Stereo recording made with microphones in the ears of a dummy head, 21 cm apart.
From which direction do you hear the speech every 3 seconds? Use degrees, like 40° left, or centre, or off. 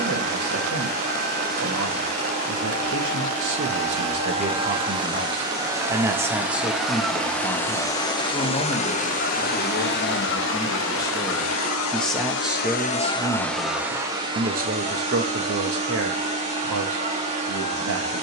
70° right, 40° right, 10° left, 20° left, 20° right, 60° right.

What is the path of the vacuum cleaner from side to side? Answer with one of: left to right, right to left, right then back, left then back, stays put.
left then back.